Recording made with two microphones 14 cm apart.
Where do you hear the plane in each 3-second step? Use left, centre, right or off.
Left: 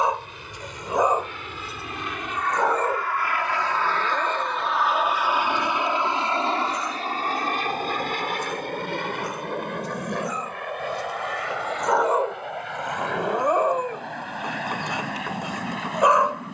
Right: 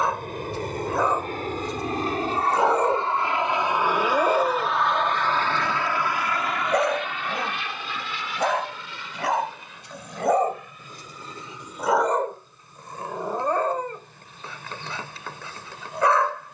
right, centre, left, left, left, left.